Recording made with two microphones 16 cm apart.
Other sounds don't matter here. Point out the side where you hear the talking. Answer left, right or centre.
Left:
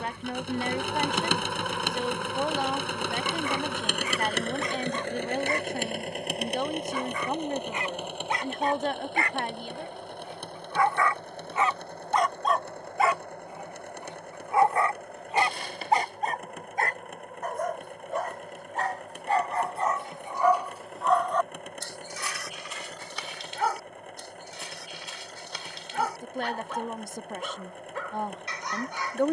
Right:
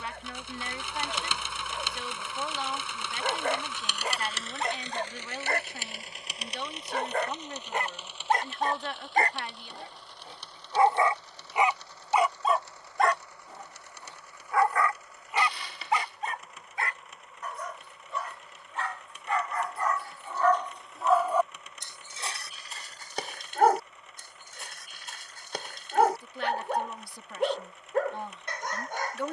left.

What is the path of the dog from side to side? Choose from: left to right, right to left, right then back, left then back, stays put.
left then back.